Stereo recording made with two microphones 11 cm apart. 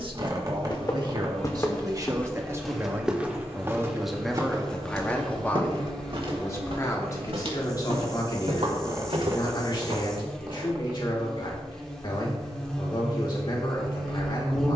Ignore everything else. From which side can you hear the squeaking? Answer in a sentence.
In this clip you hear the squeaking on the right.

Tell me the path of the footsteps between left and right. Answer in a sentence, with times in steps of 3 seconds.
In this clip you hear the footsteps on the left from 0 s, on the right from 3 s and not at all from 12 s.